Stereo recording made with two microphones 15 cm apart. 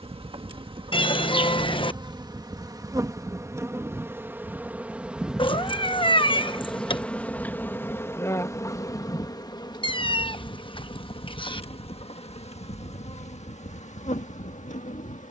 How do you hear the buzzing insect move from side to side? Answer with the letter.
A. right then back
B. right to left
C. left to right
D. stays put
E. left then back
B.